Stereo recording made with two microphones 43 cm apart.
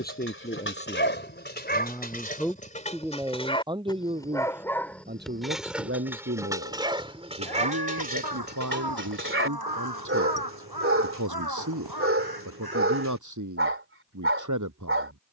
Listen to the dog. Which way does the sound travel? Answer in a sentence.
In this clip you hear the dog move from left to right.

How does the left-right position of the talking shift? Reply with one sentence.
You can hear the talking move to the right.